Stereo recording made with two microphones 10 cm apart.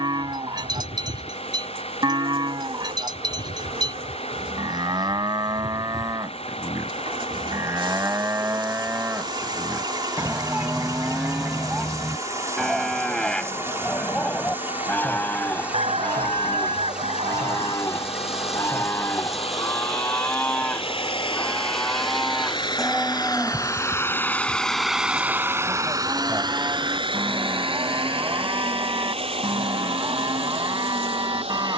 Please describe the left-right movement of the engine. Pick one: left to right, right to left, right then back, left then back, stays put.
left to right.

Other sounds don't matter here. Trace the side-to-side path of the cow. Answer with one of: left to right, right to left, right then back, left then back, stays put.
left then back.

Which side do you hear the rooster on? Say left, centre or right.
right.